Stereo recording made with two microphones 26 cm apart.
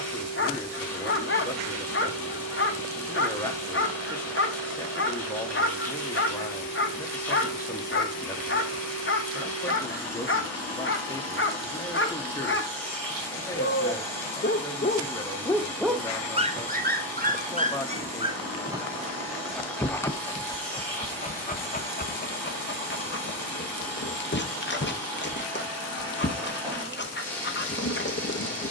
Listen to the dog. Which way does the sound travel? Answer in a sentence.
In this clip you hear the dog go right and come back.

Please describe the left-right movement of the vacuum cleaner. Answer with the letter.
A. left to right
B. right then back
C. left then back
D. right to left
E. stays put
E.